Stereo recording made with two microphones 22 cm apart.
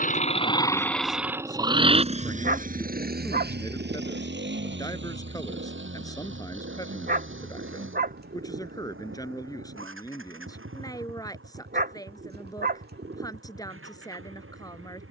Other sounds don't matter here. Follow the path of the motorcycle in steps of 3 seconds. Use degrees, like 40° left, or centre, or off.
10° right, 50° right, 60° right, 70° right, 70° right.